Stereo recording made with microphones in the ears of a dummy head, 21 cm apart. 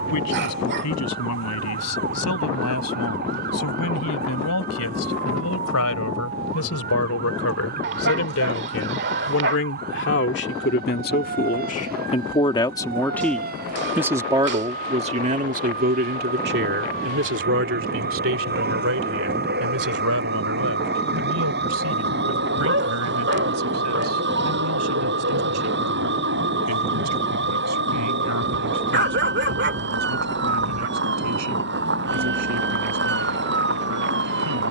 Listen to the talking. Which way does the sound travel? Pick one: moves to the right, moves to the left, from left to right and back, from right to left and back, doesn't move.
moves to the right.